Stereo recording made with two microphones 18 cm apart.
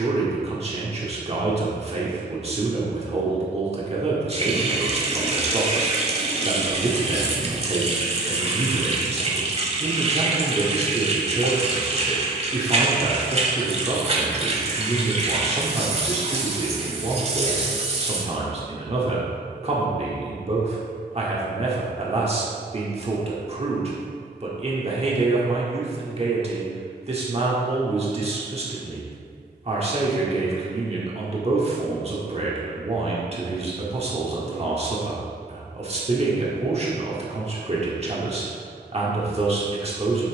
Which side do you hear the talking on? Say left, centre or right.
right.